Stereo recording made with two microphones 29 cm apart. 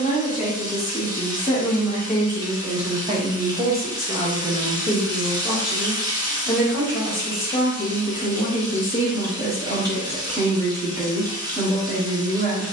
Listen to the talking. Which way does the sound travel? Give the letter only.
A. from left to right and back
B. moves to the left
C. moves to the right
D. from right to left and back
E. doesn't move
A.